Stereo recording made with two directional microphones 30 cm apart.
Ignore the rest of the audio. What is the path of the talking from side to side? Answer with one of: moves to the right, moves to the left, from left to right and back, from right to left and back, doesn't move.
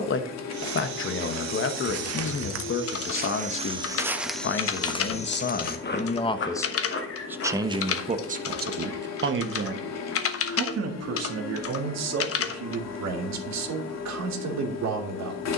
moves to the right.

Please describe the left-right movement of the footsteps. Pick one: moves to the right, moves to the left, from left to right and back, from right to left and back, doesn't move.
moves to the left.